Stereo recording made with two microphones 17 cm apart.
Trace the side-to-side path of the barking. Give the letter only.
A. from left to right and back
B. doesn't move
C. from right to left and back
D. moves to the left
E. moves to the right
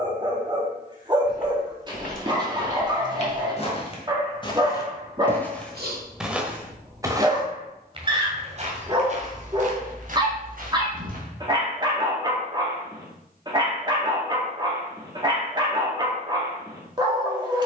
B.